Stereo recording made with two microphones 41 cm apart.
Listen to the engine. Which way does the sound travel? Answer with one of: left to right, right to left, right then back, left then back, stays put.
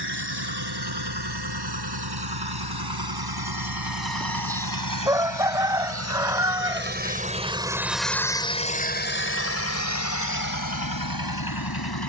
right to left.